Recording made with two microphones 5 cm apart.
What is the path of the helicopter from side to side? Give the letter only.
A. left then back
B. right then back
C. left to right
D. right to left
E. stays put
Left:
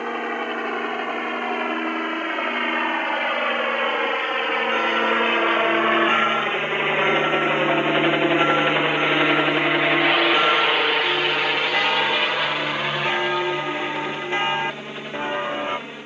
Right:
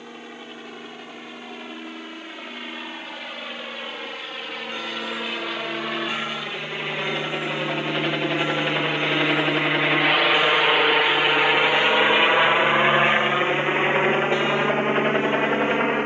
C.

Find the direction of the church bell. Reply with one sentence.
You can hear the church bell on the left.